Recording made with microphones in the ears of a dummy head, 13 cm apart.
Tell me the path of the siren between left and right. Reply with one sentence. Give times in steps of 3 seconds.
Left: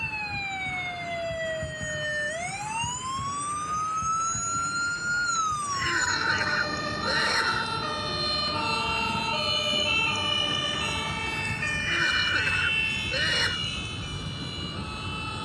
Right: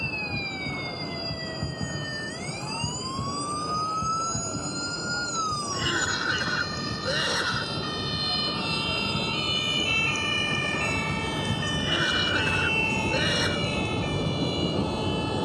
In this clip you hear the siren on the left from 0 s, in the centre from 9 s and on the right from 12 s.